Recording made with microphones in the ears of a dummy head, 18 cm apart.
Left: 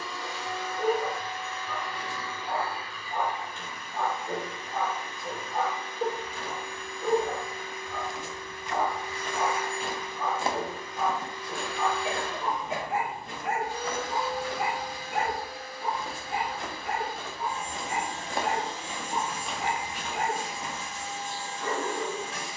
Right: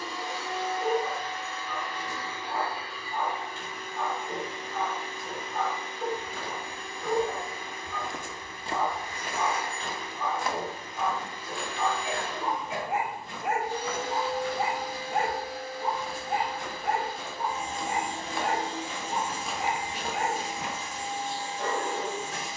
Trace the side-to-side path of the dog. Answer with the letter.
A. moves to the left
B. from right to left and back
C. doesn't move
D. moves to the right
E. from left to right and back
D.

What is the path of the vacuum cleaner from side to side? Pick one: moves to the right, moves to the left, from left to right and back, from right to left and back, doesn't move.
doesn't move.